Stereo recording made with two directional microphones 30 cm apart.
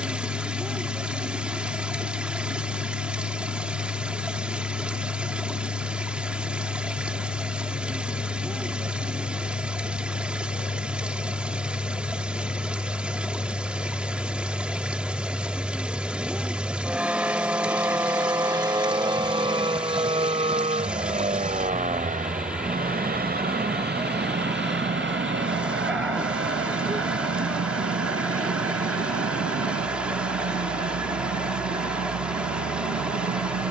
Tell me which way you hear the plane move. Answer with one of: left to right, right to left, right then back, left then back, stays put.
left to right.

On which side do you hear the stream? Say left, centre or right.
centre.